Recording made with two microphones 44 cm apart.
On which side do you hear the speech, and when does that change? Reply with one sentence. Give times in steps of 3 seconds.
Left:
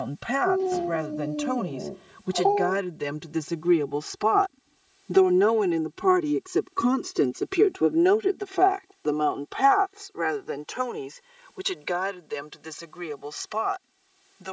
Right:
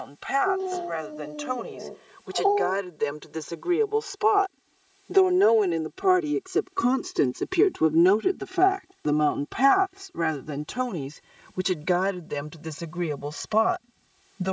In this clip you hear the speech on the left from 0 s, in the centre from 6 s and on the right from 9 s.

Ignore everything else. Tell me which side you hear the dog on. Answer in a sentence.
In this clip you hear the dog on the left.